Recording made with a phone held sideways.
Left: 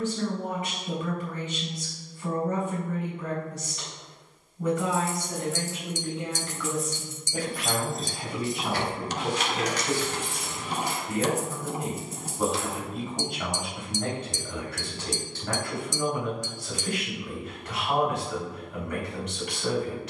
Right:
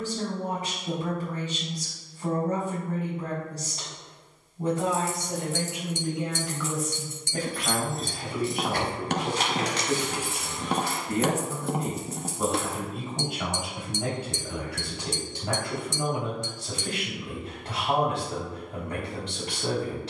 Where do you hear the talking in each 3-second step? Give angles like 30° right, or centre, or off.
40° right, 30° right, 10° left, 10° left, 10° right, 20° right, 30° right.